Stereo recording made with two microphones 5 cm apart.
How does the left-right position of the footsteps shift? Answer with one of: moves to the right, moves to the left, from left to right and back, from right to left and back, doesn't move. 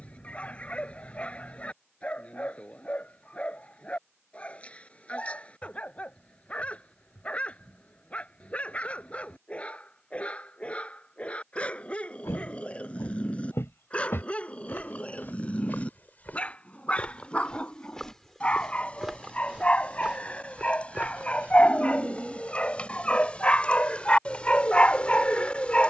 moves to the right.